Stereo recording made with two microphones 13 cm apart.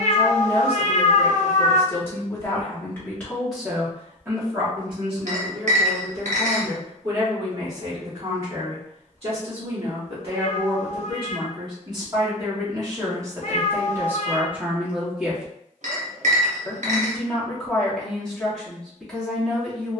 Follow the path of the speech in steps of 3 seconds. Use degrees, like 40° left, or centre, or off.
20° left, 30° right, 60° right, 40° right, 20° right, centre, centre.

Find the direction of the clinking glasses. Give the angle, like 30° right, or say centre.
60° right.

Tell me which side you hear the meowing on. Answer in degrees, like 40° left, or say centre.
60° left.